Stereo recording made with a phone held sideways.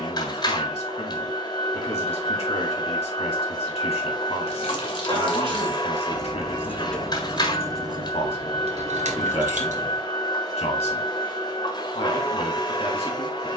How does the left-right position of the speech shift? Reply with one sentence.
In this clip you hear the speech stay put.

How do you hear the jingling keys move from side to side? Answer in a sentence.
In this clip you hear the jingling keys travel towards the right.